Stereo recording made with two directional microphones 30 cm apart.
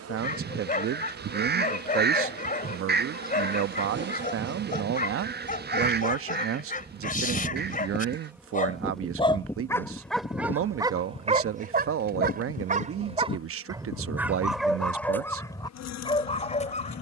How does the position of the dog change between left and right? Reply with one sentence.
In this clip you hear the dog go right and come back.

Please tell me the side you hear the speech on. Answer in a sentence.
In this clip you hear the speech on the right.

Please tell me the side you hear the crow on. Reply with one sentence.
You can hear the crow on the right.